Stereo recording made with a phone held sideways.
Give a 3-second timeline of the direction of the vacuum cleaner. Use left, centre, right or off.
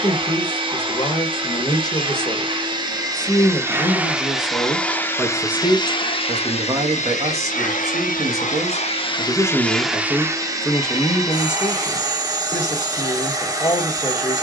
right, centre, left, centre, right.